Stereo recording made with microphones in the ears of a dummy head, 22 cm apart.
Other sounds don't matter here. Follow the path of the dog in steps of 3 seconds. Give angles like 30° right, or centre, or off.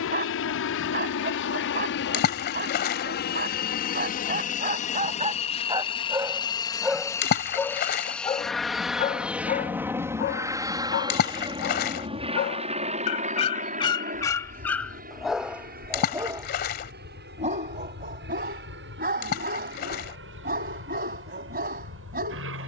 40° right, 30° right, centre, 40° left, 20° left, 20° right, 40° right, 40° right.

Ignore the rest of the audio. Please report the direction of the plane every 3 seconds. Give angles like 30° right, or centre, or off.
50° left, 30° left, 10° left, 10° right, 30° right, 40° right, 40° right, 50° right.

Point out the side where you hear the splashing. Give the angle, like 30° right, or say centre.
40° left.